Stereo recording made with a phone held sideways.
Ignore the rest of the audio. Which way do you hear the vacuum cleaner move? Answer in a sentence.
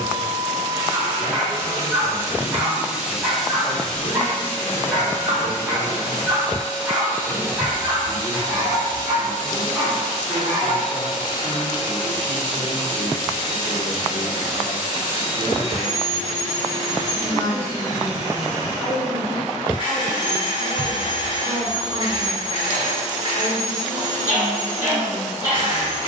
In this clip you hear the vacuum cleaner move from right to left.